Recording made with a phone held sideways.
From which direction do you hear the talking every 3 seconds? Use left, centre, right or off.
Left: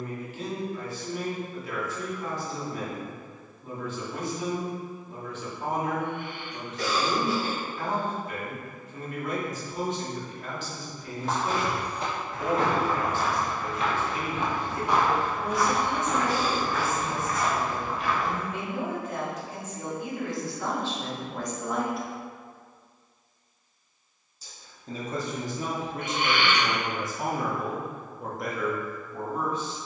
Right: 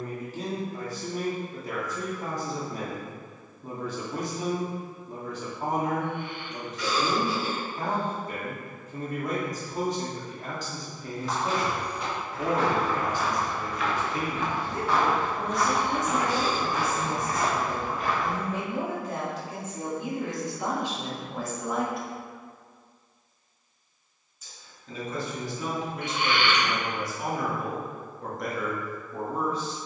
right, right, right, right, right, right, right, centre, left, centre.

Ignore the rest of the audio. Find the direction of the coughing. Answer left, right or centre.
left.